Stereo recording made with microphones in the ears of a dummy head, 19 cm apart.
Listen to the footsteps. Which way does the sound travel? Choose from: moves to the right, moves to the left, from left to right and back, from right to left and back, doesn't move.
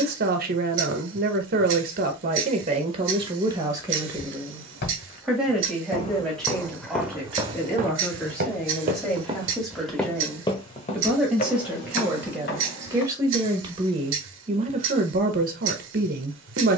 from left to right and back.